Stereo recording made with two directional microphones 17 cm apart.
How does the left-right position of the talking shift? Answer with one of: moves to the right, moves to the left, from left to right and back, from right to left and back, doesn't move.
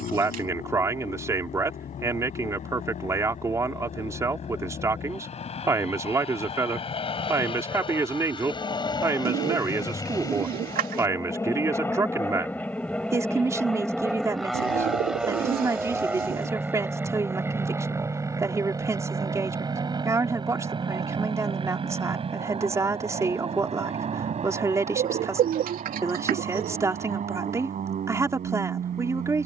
doesn't move.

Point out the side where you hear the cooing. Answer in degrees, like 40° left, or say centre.
60° right.